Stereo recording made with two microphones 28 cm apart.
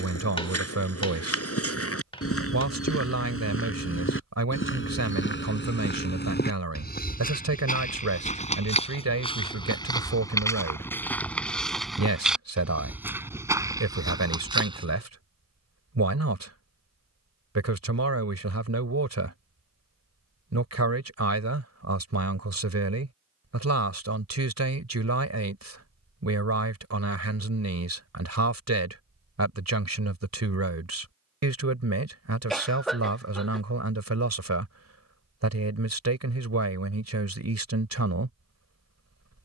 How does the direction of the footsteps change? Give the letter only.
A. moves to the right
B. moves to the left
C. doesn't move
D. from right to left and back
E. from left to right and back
A.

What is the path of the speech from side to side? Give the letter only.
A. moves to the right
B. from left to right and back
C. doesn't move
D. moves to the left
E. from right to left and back
C.